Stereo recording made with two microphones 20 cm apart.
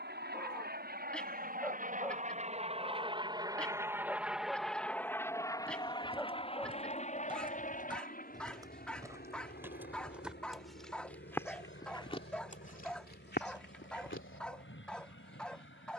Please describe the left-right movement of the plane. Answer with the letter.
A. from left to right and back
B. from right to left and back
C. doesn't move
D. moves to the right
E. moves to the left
E.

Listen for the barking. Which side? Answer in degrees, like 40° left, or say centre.
centre.